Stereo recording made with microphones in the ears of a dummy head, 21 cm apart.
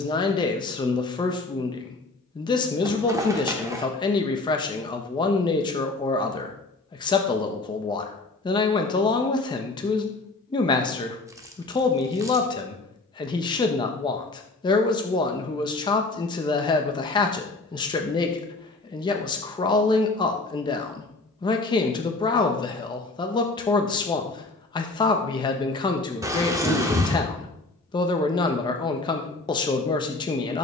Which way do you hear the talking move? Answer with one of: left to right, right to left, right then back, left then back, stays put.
stays put.